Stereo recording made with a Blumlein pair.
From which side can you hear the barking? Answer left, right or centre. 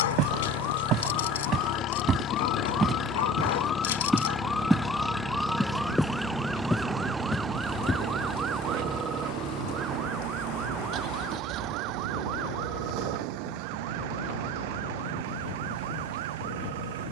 left.